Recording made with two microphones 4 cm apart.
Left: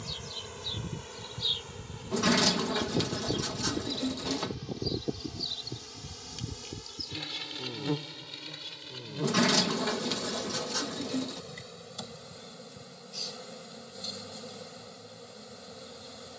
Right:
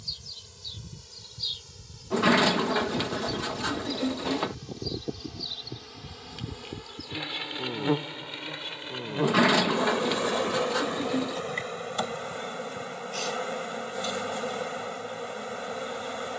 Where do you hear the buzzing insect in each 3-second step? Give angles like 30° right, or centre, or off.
40° left, 10° left, 30° right, 50° right, 60° right, 60° right.